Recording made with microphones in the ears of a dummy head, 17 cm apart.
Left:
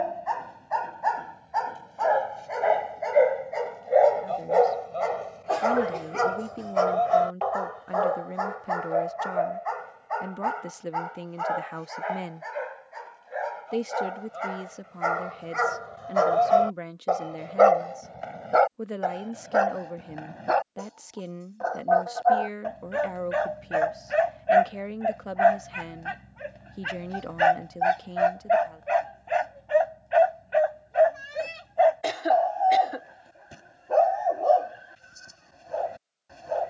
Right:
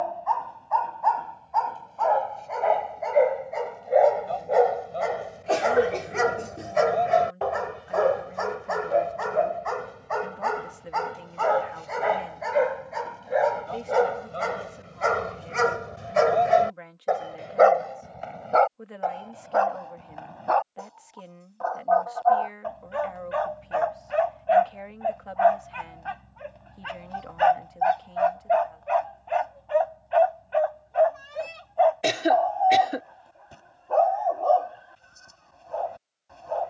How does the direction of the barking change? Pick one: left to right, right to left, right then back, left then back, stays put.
right then back.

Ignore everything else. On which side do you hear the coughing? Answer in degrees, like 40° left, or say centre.
30° right.